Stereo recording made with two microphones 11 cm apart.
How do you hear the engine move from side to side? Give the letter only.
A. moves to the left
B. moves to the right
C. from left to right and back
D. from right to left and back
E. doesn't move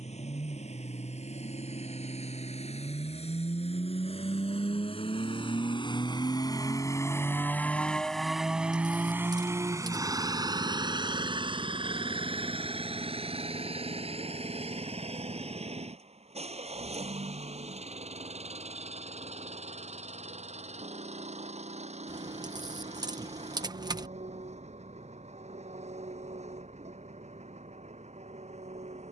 B.